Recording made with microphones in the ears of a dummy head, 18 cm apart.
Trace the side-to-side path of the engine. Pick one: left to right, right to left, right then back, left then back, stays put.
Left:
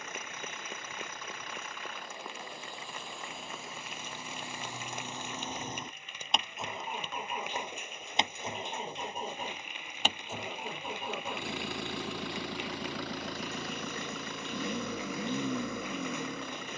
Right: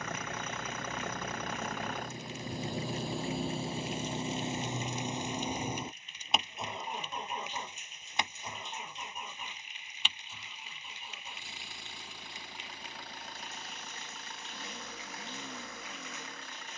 right to left.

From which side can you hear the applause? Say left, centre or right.
left.